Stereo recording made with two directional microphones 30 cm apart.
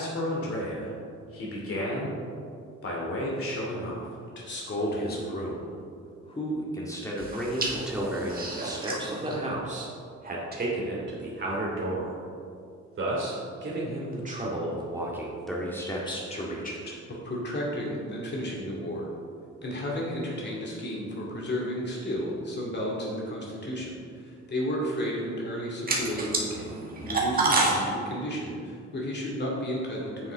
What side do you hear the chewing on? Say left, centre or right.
right.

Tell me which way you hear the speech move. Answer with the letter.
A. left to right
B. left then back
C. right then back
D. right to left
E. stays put
C.